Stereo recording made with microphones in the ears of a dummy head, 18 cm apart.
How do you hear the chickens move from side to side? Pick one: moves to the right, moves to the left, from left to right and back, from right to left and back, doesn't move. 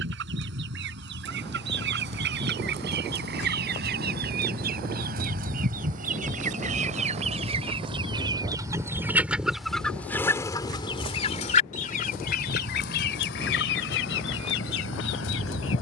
moves to the left.